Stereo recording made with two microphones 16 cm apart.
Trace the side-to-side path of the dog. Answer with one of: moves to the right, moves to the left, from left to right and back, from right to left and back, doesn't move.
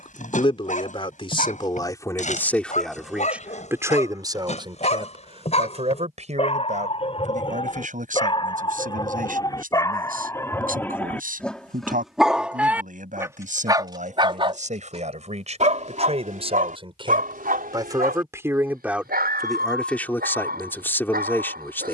moves to the right.